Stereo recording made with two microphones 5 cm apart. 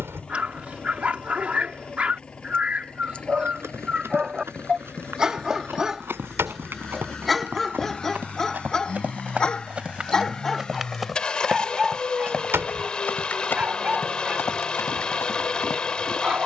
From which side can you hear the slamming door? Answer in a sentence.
In this clip you hear the slamming door on the right.